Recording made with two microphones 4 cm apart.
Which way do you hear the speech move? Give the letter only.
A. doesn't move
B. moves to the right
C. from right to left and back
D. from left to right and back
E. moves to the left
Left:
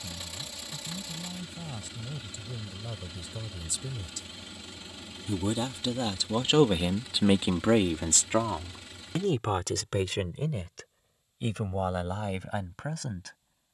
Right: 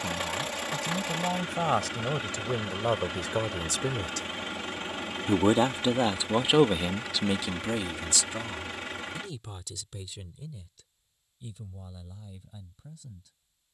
E.